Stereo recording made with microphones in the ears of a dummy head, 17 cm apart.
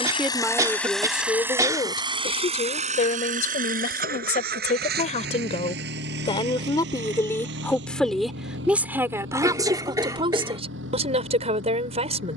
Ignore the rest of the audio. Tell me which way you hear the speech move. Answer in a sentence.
You can hear the speech go left and come back.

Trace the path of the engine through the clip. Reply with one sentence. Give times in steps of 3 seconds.
In this clip you hear the engine in the centre from 0 s and on the right from 3 s.